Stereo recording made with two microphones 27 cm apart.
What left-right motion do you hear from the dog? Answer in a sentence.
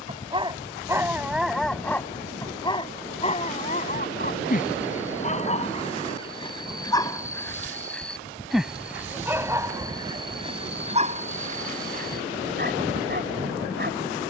In this clip you hear the dog go left and come back.